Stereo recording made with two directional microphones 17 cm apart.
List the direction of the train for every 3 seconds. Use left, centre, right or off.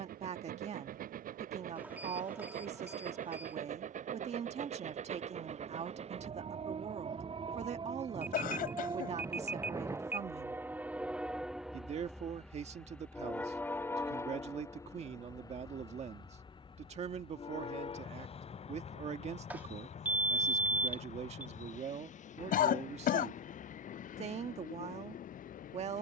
right, right, right, centre, centre, left, left, left, left.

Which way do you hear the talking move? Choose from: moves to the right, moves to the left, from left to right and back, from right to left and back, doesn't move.
doesn't move.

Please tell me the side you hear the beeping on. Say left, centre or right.
centre.